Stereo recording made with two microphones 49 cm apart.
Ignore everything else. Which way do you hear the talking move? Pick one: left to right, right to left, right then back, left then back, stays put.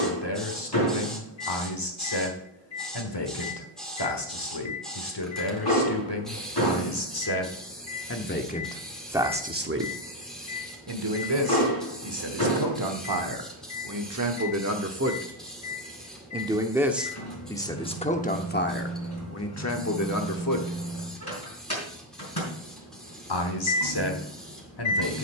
right then back.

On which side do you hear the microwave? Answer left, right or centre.
left.